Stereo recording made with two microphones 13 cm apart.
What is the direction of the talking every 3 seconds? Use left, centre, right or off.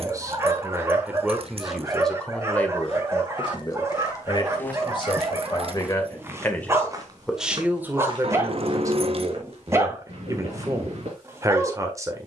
centre, left, centre, right.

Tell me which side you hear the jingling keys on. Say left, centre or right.
right.